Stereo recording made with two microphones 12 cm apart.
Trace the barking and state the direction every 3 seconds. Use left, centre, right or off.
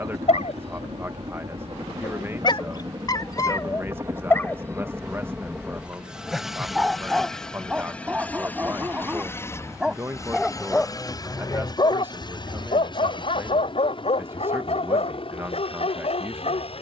left, left, centre, centre, left, left.